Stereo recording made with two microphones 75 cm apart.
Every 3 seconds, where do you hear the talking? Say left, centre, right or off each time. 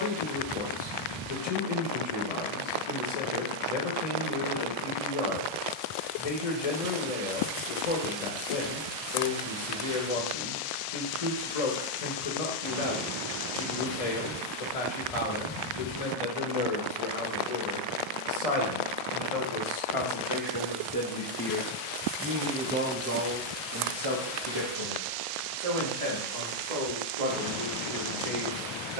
left, left, left, left, left, left, left, centre, right, right.